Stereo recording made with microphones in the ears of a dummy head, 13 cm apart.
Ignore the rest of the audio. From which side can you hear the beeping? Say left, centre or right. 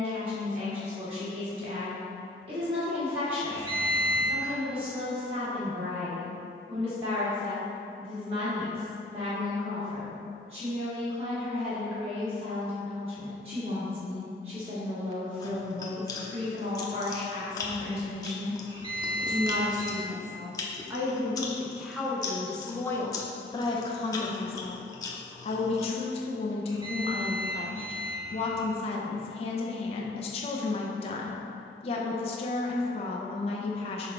right.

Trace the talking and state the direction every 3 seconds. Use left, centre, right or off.
right, right, right, right, right, right, right, centre, left, left, left, left.